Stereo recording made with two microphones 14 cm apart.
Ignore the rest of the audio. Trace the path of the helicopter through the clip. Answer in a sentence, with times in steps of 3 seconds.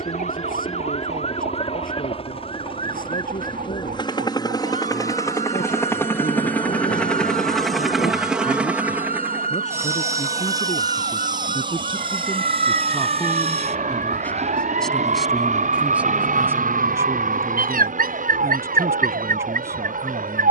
You can hear the helicopter on the left from 0 s, in the centre from 6 s and on the right from 9 s.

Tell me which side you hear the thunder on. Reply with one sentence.
You can hear the thunder on the left.